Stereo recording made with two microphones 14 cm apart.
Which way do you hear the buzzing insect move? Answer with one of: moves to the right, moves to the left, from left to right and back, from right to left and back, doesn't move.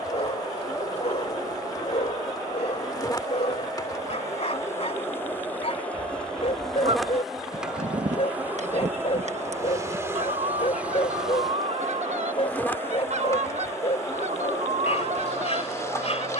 from left to right and back.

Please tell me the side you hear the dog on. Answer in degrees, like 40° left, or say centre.
50° left.